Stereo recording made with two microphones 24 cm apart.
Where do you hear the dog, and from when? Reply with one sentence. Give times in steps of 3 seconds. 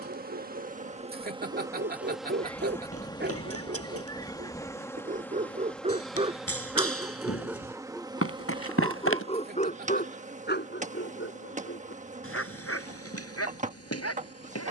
In this clip you hear the dog on the right from 0 s, in the centre from 6 s and on the left from 9 s.